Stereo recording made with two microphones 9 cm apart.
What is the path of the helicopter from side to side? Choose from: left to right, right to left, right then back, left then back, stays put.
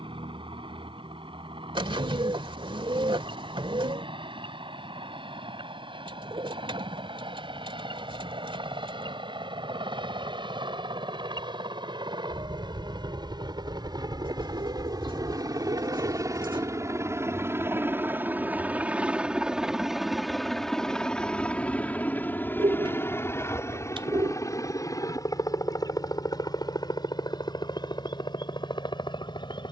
right to left.